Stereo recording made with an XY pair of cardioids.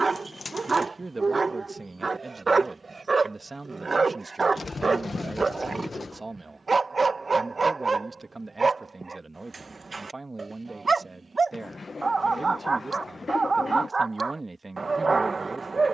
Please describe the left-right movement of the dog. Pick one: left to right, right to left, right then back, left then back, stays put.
stays put.